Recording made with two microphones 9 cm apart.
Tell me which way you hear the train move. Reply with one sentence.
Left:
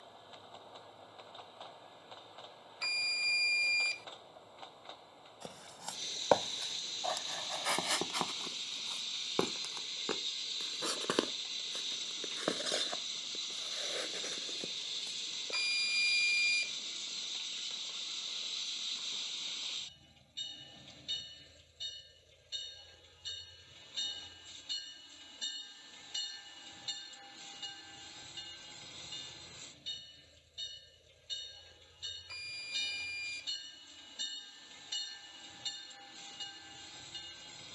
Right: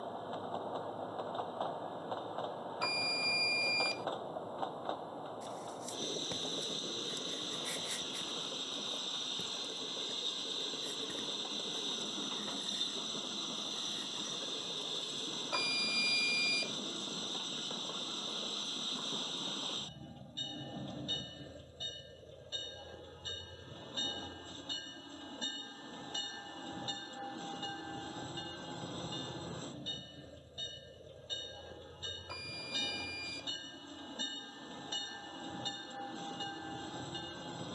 In this clip you hear the train stay in one place.